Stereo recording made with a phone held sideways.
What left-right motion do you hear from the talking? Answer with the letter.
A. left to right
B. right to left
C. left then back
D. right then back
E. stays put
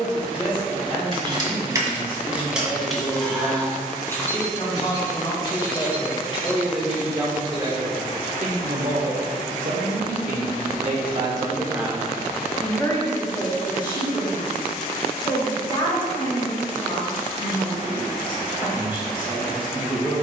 D.